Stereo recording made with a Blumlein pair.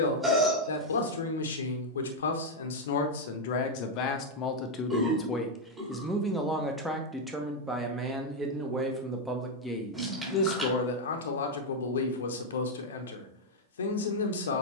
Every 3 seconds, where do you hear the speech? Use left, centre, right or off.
left, left, centre, left, left.